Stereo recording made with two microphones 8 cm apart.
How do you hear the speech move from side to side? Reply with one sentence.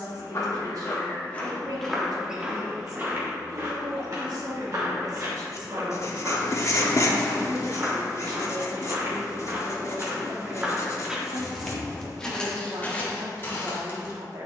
In this clip you hear the speech stay put.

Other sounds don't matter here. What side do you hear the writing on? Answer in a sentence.
In this clip you hear the writing on the left.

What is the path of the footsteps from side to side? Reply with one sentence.
You can hear the footsteps go right and come back.